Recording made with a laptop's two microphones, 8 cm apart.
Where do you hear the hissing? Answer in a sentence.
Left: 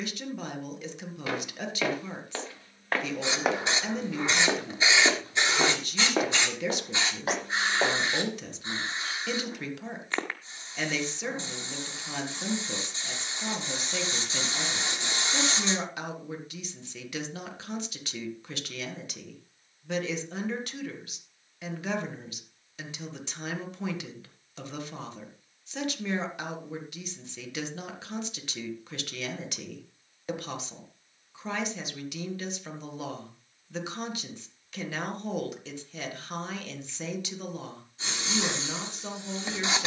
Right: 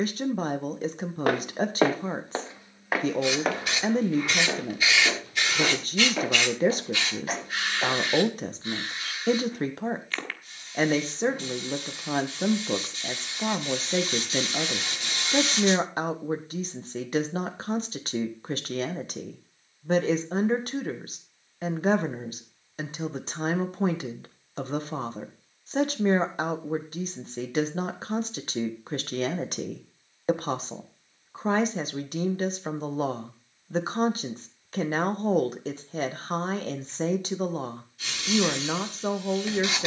In this clip you hear the hissing on the left.